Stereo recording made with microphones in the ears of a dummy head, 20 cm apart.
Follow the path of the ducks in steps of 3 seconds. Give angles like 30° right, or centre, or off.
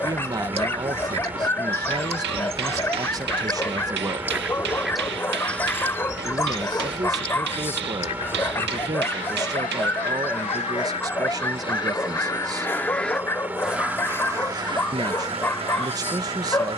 30° right, 10° right, 20° left, 30° left, centre, 30° right.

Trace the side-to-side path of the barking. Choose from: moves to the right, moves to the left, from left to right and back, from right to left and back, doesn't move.
doesn't move.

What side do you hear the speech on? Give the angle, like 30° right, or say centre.
20° right.